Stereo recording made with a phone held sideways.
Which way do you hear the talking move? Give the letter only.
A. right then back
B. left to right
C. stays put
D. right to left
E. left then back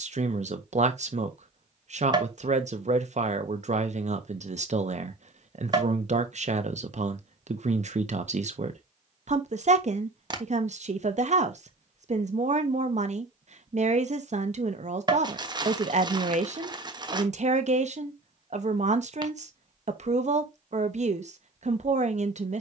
C.